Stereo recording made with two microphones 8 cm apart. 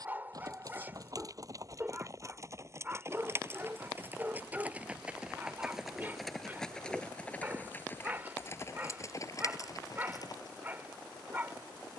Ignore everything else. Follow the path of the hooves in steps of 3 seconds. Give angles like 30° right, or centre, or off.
40° right, 20° right, 20° left, 40° left.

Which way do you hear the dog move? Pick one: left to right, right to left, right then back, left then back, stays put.
stays put.